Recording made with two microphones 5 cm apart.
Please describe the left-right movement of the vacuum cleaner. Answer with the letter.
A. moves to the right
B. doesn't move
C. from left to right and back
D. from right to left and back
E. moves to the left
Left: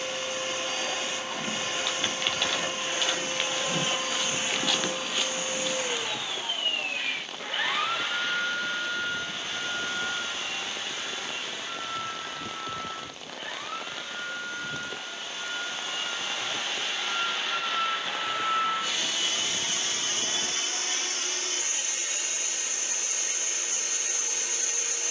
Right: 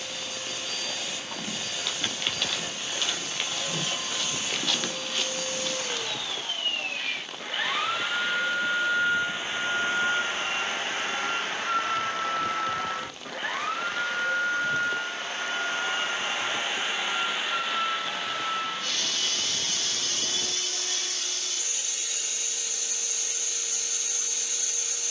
C.